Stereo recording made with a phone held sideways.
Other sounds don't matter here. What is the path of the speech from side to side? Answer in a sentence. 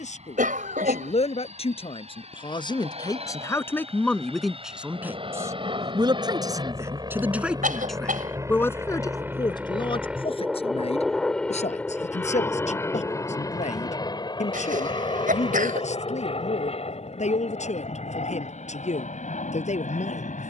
You can hear the speech move from left to right and back again.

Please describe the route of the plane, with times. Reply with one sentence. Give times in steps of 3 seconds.
In this clip you hear the plane on the right from 0 s, in the centre from 9 s and on the left from 12 s.